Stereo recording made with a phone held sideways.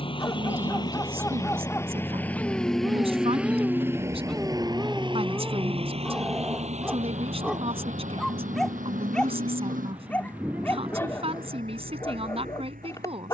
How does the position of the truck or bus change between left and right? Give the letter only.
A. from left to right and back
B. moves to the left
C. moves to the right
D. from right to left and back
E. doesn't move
C.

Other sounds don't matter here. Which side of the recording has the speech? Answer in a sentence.
You can hear the speech on the right.